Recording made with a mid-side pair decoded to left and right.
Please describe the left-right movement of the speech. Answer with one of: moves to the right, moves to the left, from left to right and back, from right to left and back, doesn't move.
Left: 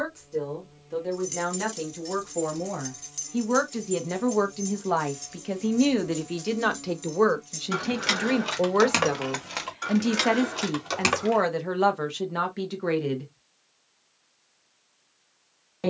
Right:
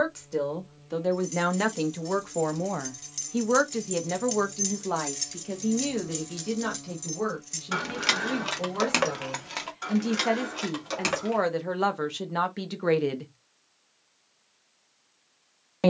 from right to left and back.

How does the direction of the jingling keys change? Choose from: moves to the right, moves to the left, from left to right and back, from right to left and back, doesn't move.
from left to right and back.